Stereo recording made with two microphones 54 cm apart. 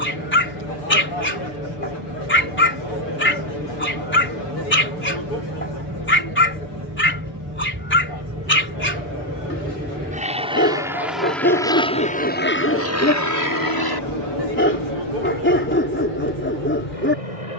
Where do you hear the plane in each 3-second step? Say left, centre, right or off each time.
right, right, right, centre, left, left.